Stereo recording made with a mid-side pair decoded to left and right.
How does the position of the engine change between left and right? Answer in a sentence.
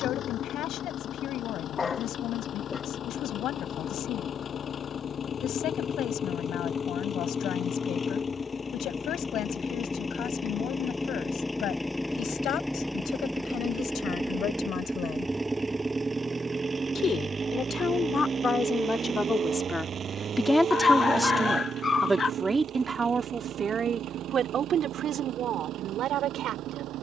You can hear the engine move to the right.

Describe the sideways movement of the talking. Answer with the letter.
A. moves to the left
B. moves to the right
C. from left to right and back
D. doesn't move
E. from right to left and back
B.